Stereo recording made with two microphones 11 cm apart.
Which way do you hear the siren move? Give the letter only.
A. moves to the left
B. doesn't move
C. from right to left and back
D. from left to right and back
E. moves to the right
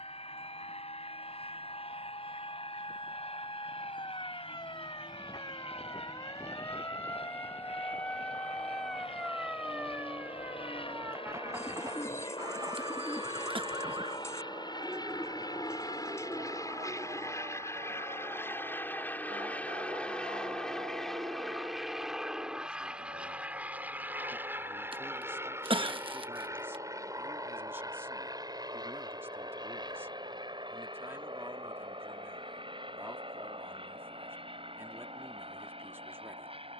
E.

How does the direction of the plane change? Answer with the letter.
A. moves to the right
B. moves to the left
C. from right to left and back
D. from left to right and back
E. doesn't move
A.